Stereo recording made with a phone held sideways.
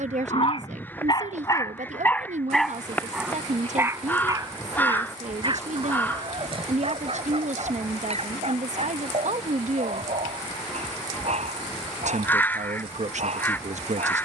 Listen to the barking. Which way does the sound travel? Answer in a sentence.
You can hear the barking move to the right.